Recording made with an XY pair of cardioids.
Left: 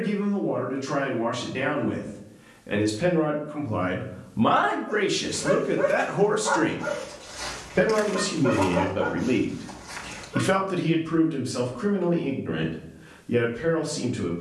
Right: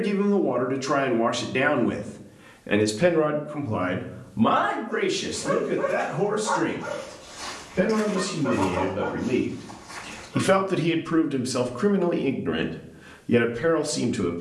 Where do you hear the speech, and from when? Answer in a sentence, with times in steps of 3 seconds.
In this clip you hear the speech on the right from 0 s, in the centre from 3 s, on the left from 6 s, in the centre from 9 s and on the right from 12 s.